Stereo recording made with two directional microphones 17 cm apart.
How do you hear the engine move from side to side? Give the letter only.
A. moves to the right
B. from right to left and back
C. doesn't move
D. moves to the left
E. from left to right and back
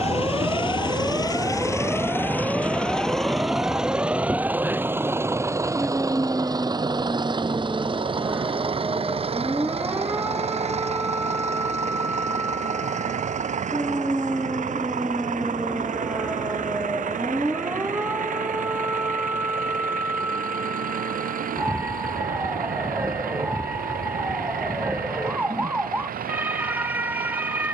A.